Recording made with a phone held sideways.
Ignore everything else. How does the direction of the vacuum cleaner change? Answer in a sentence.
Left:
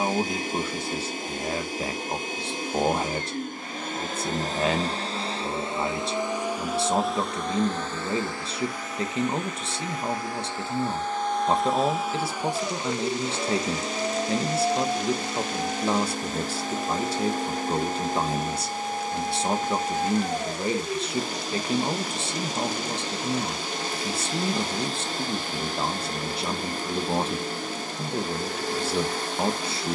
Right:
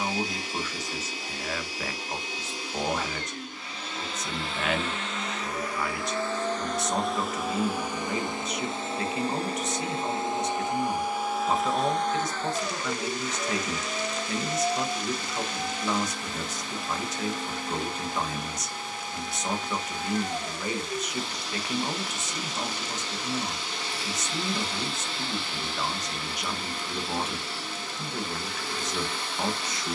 In this clip you hear the vacuum cleaner move from left to right and back again.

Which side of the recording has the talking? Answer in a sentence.
You can hear the talking on the left.